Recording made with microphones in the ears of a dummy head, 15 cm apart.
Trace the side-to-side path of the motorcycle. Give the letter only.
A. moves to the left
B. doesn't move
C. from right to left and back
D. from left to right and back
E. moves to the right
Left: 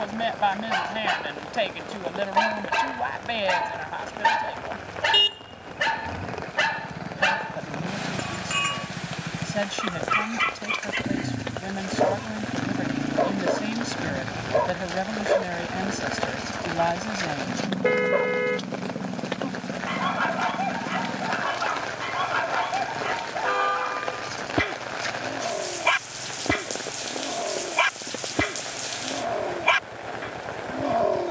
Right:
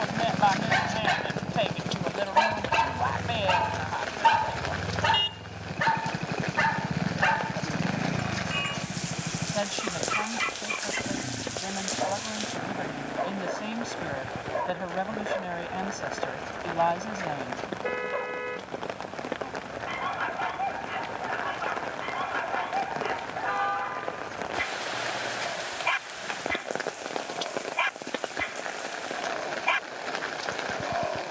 A.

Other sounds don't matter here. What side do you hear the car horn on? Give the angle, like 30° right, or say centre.
60° left.